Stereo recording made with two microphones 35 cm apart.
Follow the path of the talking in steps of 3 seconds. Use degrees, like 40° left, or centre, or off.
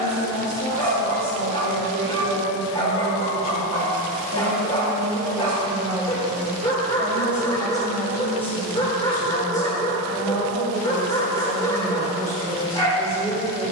60° right, 40° right, centre, 10° left, 10° left.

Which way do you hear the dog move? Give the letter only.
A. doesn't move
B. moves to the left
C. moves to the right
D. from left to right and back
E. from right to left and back
A.